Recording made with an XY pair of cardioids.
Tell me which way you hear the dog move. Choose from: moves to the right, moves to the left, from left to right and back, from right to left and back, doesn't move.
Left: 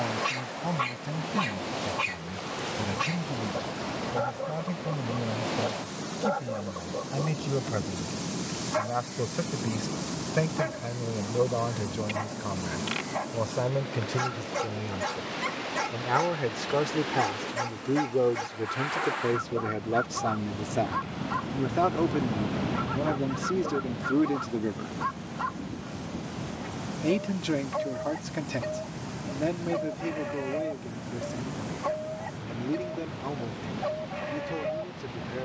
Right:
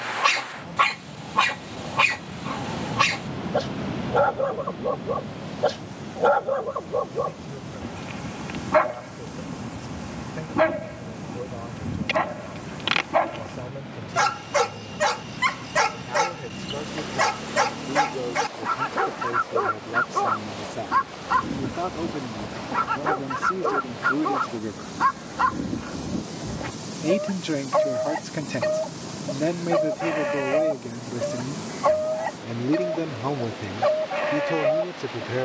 doesn't move.